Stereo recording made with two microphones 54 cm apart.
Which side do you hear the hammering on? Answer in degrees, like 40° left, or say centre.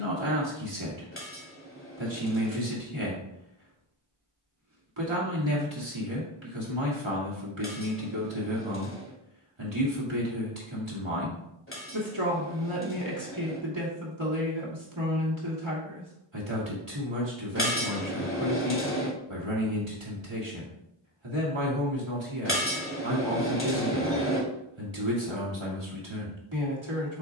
20° left.